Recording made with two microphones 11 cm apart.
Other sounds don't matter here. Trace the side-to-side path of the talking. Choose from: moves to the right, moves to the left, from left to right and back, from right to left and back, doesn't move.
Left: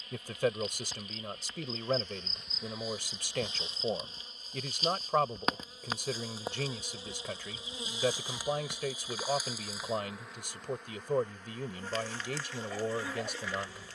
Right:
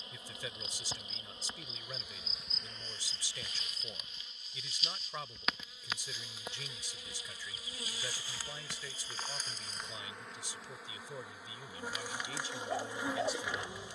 doesn't move.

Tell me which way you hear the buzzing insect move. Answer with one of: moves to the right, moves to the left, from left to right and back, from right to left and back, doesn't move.
from right to left and back.